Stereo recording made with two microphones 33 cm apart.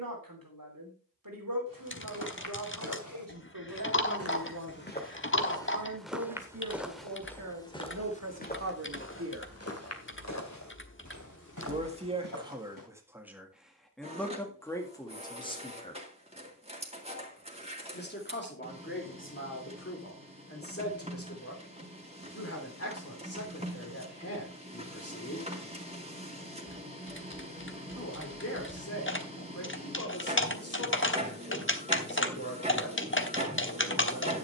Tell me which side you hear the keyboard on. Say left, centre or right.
left.